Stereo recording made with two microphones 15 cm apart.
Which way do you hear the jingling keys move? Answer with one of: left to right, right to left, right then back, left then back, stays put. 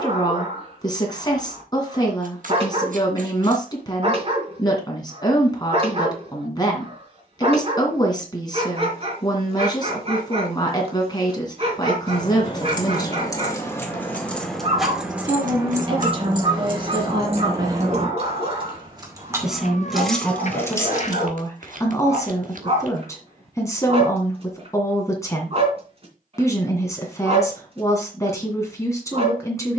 right then back.